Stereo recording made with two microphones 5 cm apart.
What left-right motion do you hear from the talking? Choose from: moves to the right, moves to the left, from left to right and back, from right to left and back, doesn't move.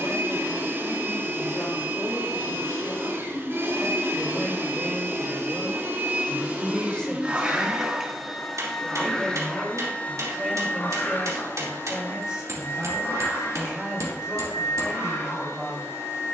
moves to the right.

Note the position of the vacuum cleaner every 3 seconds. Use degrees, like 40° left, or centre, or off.
50° right, 50° right, 20° right, 30° left, 60° left, 70° left.